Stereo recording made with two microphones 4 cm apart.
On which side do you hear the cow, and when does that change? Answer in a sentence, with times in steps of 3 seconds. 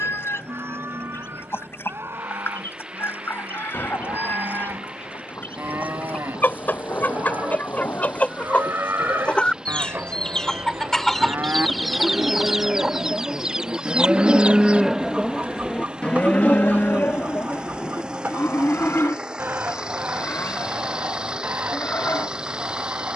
You can hear the cow on the right from 0 s and on the left from 15 s.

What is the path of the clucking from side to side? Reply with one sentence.
You can hear the clucking move to the right.